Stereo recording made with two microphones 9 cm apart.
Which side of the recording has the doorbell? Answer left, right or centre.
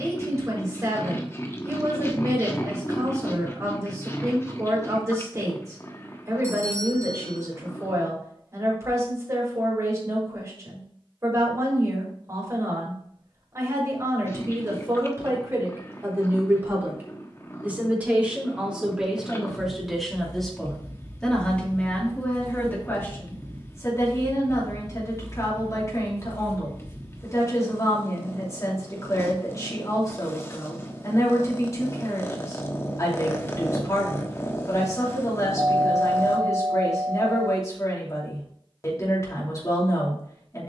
right.